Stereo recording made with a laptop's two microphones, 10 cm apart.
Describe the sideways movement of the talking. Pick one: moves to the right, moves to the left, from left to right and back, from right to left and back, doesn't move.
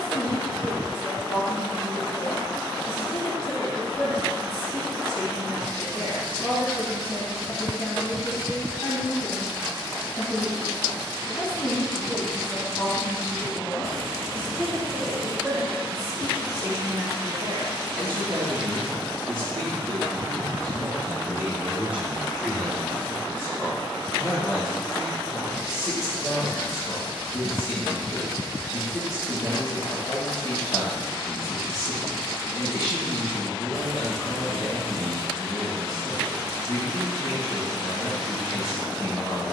from left to right and back.